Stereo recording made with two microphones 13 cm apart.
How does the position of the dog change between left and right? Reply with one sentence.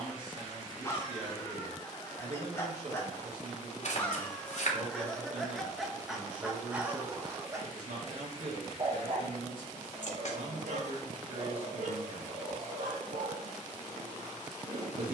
You can hear the dog go from the left side to the right.